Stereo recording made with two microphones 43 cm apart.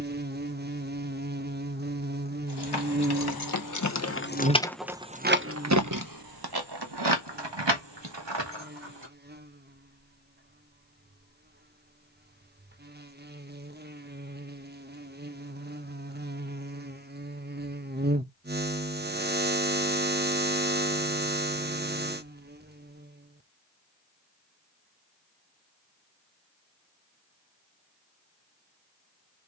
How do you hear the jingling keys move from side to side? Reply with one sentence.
You can hear the jingling keys go from the left side to the right.